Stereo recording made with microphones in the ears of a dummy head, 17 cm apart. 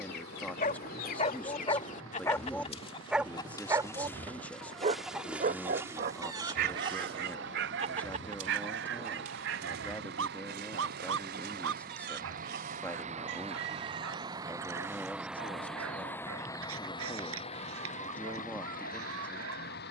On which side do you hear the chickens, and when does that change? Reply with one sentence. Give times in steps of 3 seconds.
You can hear the chickens on the left from 0 s, in the centre from 3 s and on the right from 6 s.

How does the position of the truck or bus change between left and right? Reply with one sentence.
In this clip you hear the truck or bus travel towards the left.